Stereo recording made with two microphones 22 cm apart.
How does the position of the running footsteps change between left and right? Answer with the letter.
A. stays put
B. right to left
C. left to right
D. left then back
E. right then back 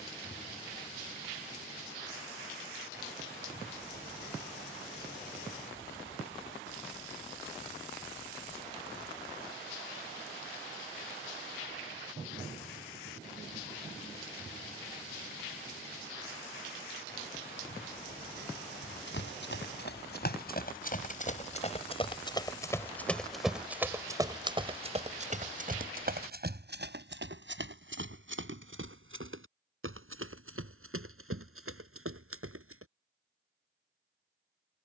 C.